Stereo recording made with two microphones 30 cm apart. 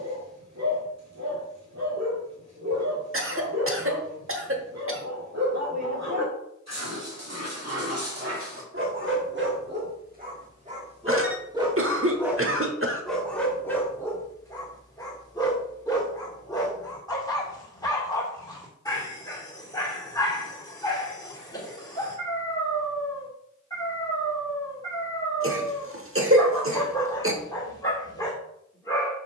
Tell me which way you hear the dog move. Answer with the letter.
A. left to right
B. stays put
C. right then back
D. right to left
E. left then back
D.